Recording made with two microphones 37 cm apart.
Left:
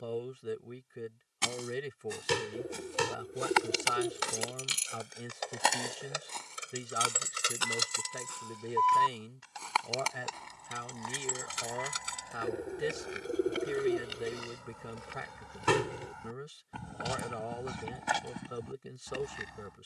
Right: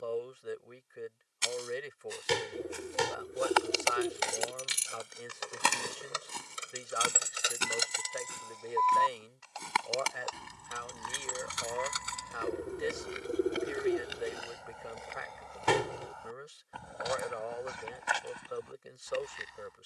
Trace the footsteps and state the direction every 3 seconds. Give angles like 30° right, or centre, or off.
60° left, 10° left, 30° right, 20° right, centre, 40° left, 60° left.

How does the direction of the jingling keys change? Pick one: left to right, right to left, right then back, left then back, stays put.
right to left.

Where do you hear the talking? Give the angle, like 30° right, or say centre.
50° left.